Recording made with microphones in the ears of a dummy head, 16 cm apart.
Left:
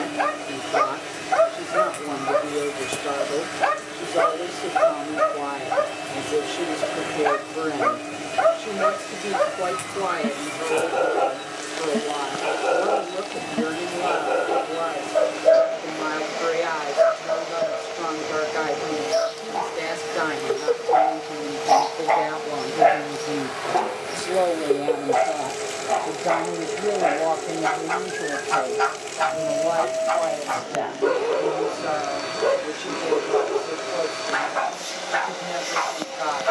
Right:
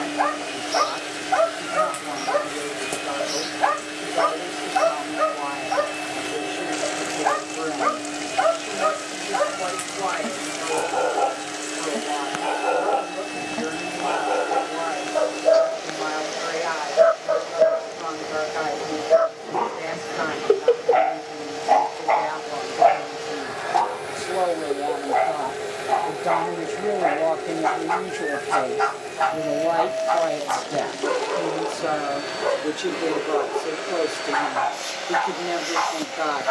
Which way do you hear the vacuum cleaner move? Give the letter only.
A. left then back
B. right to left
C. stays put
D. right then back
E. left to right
C.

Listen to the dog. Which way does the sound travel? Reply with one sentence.
In this clip you hear the dog move from left to right and back again.